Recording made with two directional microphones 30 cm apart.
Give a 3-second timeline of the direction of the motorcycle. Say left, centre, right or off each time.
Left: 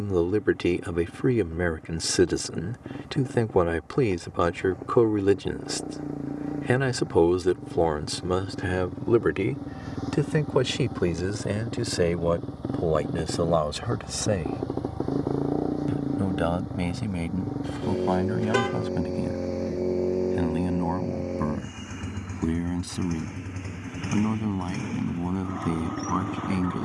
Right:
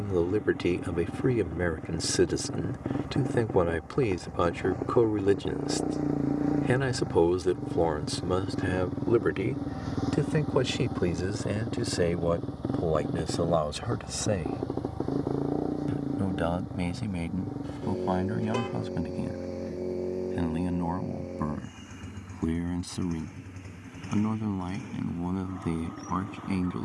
right, right, right, centre, centre, left, left, left, left.